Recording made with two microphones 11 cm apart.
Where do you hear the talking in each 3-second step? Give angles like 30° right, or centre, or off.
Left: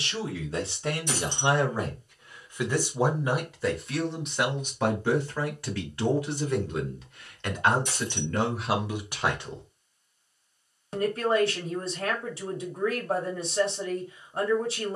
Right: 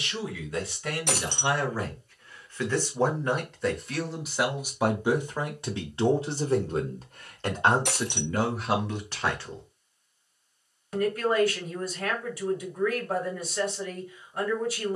20° left, 10° right, 20° right, 20° left, 30° left.